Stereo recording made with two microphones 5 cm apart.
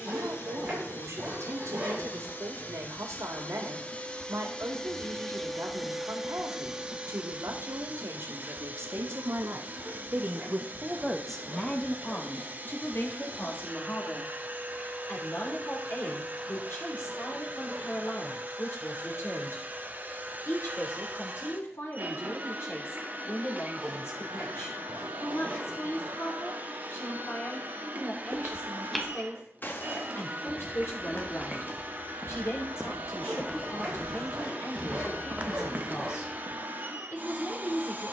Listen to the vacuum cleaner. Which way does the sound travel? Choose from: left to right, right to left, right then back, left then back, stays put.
left to right.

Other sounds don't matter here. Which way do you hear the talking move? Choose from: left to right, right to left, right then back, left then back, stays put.
right to left.